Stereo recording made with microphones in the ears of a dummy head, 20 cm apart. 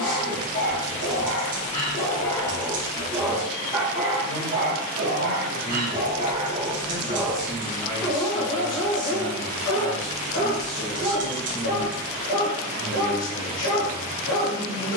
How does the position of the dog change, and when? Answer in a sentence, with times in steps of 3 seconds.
You can hear the dog on the left from 0 s, on the right from 3 s, in the centre from 6 s and on the left from 9 s.